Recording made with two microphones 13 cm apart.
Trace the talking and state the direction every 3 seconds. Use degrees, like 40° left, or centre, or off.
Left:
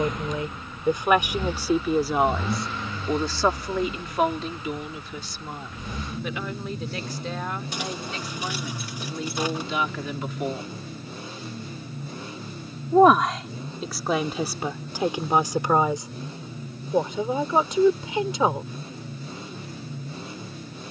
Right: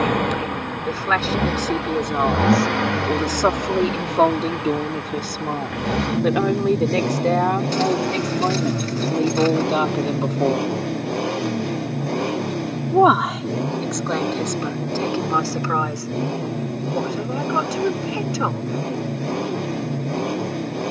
10° left, 40° right, 70° right, 50° right, centre, 20° left, 20° left.